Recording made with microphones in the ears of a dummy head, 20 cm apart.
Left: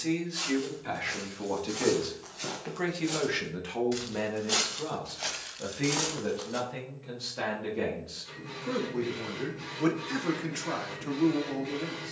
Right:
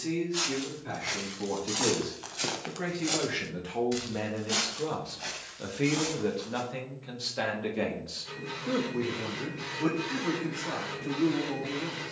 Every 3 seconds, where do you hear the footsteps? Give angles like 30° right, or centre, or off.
60° right, 20° left, 50° left, off.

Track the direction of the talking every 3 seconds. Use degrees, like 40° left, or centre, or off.
50° left, 10° left, 10° right, 40° left.